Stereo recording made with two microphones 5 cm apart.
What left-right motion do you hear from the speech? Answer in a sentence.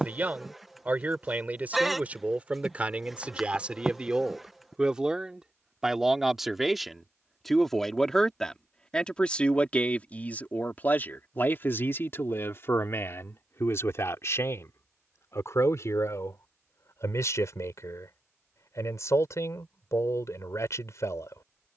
In this clip you hear the speech go from the right side to the left.